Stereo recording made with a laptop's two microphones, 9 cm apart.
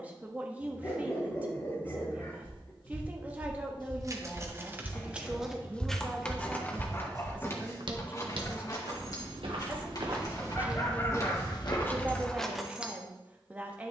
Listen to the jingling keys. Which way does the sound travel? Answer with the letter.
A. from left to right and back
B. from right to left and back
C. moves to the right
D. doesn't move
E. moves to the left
B.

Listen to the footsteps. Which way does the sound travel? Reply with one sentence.
In this clip you hear the footsteps go right and come back.